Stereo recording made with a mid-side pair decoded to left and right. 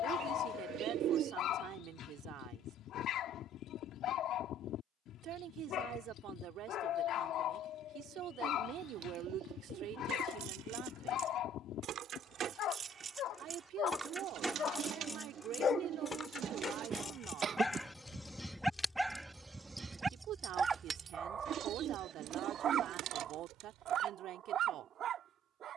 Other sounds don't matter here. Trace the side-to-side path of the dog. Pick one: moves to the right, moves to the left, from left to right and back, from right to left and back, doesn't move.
moves to the right.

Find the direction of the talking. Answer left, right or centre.
right.